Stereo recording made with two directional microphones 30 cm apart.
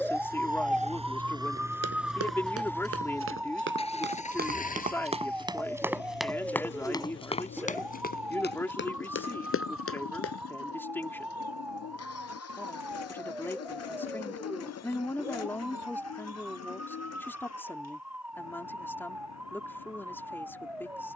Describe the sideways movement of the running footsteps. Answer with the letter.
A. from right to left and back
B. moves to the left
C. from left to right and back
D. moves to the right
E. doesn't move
B.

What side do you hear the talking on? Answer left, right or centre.
centre.